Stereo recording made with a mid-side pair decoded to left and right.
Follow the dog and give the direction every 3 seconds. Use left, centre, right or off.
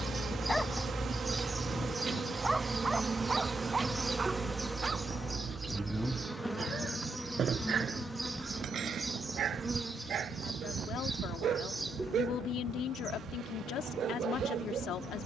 centre, right, right, right, right.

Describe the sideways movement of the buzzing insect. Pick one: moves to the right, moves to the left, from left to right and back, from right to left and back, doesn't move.
from right to left and back.